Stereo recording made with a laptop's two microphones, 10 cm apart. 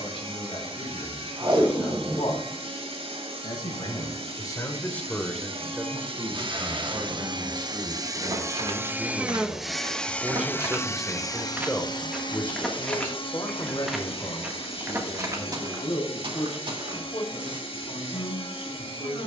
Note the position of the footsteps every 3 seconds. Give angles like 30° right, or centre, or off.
off, off, 60° right, 30° right, centre, 40° right, off.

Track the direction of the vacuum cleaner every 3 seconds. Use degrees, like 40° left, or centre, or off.
70° right, 70° right, 40° right, 20° left, 60° left, 70° left, 70° left.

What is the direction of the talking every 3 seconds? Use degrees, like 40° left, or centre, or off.
60° left, 20° left, 40° right, 10° right, 40° left, 60° left, 60° left.